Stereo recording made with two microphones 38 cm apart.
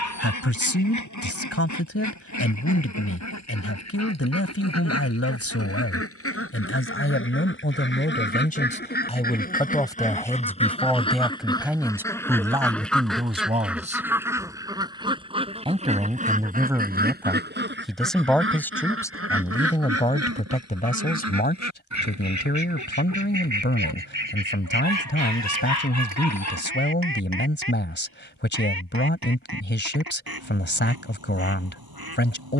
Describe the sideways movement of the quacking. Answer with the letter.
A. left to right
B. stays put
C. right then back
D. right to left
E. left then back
A.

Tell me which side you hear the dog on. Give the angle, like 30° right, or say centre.
50° left.